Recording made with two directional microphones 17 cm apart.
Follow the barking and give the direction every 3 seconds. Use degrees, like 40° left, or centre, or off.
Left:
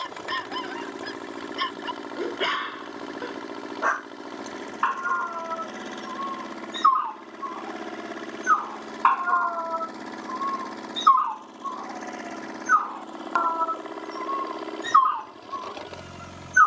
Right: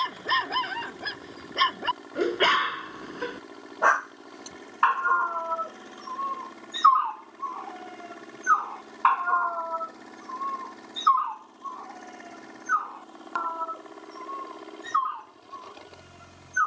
30° right, 20° right, 10° right, 10° left, 30° left, 40° left.